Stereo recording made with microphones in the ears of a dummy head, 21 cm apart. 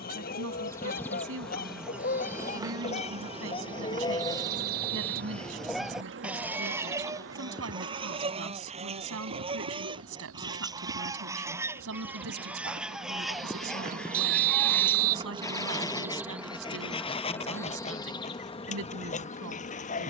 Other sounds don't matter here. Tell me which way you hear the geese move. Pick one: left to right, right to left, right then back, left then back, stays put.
right then back.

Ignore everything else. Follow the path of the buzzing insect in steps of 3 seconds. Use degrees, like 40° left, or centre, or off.
centre, 40° right, 60° right, 60° right, 40° right, centre, 30° left.